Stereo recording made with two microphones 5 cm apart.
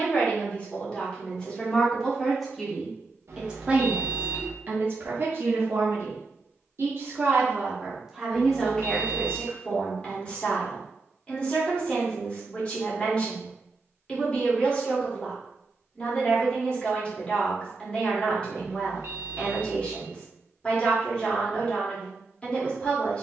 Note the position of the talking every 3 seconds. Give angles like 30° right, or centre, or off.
20° left, 40° right, 20° right, 20° left, 20° left, 20° left, 20° left, 20° left.